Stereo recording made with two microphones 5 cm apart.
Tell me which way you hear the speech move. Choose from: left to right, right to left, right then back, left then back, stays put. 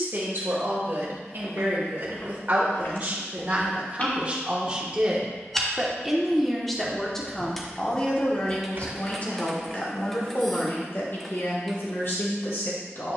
right to left.